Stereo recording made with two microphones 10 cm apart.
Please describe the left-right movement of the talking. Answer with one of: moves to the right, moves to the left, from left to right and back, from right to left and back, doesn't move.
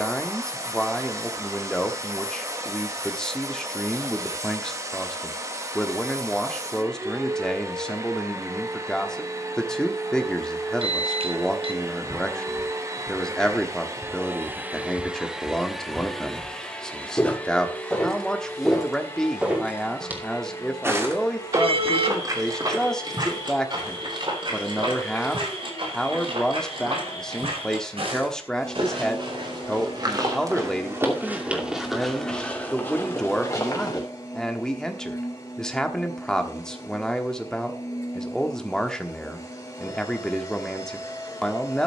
doesn't move.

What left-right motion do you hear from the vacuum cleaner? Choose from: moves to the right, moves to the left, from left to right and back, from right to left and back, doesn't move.
moves to the left.